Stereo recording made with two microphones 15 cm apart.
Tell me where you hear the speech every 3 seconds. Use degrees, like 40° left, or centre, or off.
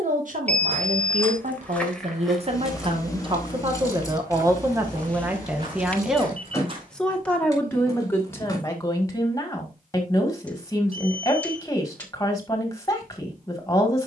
50° right, 20° right, 10° left, 20° left, 20° left.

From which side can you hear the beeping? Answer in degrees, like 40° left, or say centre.
10° left.